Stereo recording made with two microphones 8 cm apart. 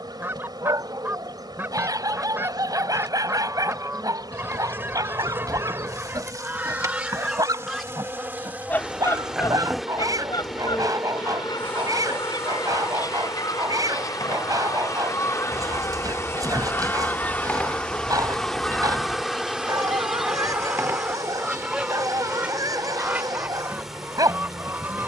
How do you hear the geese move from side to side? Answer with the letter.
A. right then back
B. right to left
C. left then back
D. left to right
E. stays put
C.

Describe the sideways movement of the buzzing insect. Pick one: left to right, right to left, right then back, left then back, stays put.
left then back.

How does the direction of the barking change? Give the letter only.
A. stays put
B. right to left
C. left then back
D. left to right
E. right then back
A.